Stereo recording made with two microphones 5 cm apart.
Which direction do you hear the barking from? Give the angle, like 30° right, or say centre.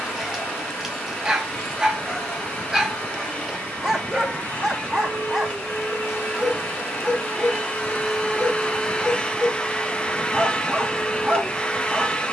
10° right.